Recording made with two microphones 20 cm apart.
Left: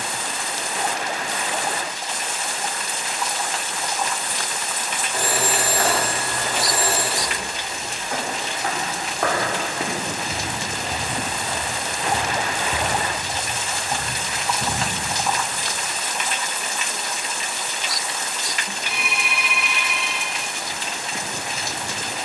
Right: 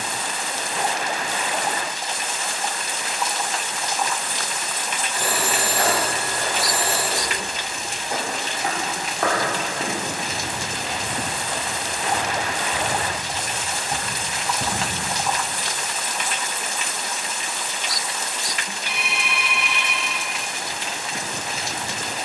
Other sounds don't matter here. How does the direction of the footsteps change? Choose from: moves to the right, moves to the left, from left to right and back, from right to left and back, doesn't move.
from right to left and back.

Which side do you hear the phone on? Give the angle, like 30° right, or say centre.
50° left.